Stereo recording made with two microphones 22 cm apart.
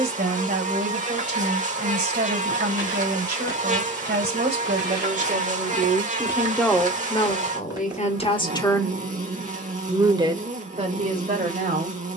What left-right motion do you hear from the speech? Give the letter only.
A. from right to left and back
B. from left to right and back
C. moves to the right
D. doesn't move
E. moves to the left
A.